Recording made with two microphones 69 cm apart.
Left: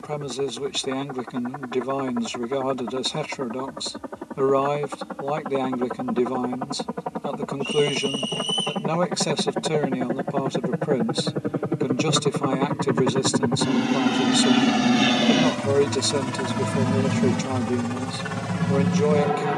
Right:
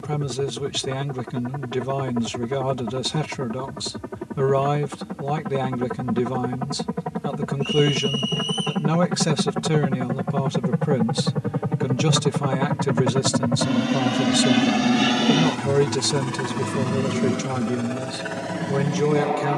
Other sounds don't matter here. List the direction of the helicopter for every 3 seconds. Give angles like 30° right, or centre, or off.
60° right, 50° right, 50° right, 40° right, 10° right, 20° left, 40° left.